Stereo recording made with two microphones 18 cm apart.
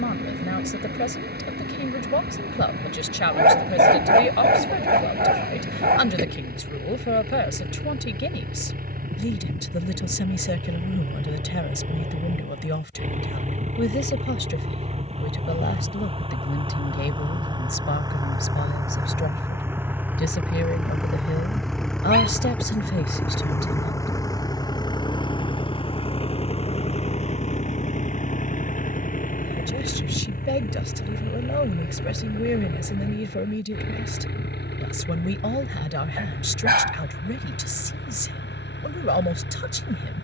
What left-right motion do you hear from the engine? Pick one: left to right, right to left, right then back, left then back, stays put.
right to left.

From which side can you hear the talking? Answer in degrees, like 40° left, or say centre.
70° left.